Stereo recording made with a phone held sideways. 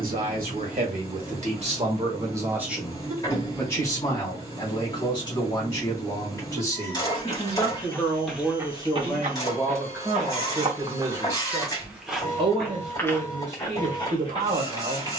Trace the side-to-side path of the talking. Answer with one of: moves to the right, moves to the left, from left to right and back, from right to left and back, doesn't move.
from right to left and back.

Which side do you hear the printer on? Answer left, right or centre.
left.